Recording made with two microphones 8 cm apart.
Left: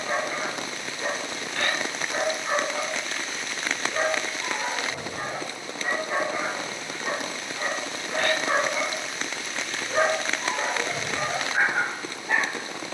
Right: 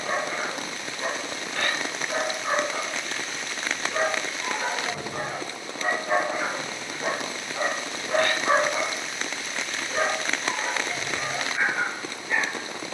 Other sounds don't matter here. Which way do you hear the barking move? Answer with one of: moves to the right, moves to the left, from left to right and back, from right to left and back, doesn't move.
moves to the left.